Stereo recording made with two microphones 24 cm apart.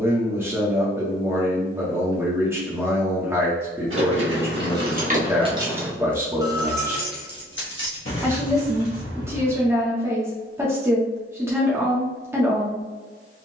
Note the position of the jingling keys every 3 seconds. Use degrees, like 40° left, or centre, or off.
off, 40° right, 50° left, 70° left, off.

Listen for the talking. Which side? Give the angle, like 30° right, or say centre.
10° right.